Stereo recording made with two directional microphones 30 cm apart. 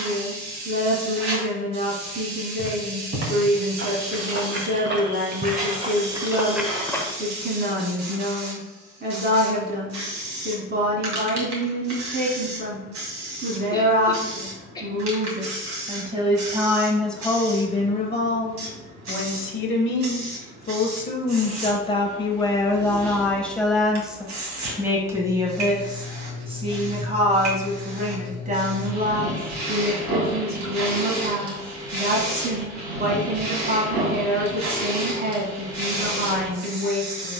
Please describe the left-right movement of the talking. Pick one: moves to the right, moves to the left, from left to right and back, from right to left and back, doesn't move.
from right to left and back.